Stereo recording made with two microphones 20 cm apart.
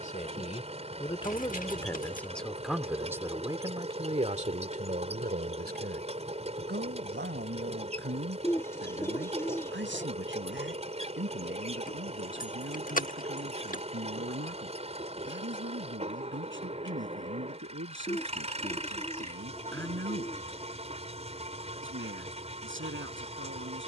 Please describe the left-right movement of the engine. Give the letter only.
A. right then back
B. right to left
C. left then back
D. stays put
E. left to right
D.